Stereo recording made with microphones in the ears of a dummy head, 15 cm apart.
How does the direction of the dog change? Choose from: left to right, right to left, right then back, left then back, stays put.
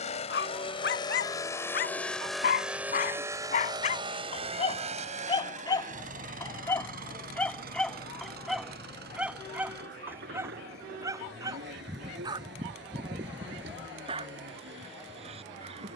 left to right.